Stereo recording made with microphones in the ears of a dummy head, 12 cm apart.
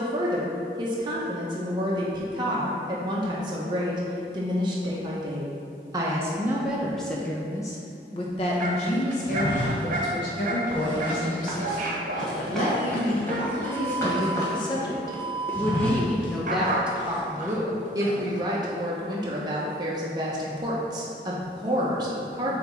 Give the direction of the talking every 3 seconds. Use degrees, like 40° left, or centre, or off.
30° right, 30° right, 10° left, 60° left, 40° left, centre, 30° right, 30° right.